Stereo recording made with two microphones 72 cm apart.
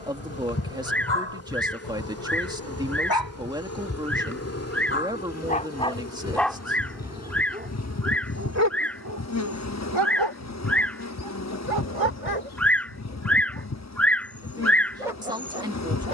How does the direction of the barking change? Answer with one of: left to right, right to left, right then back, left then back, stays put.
left to right.